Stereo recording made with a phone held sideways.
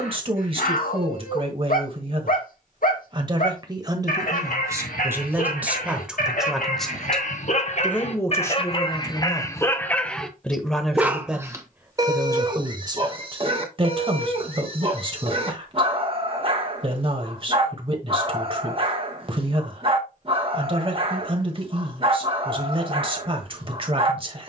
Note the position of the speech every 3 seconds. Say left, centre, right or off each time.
right, right, centre, centre, right, right, right, right.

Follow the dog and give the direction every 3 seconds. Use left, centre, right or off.
left, left, left, centre, right, right, right, right.